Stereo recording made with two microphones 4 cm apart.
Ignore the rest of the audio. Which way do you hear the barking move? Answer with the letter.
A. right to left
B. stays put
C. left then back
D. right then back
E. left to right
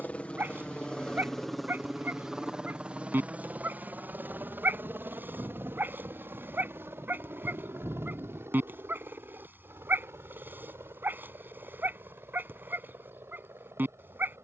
B.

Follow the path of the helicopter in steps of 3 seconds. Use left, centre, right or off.
centre, right, right, right, right.